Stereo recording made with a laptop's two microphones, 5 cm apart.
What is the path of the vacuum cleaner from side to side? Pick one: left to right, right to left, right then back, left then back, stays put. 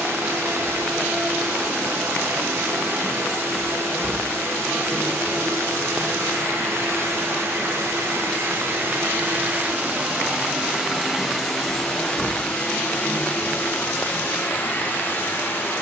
right to left.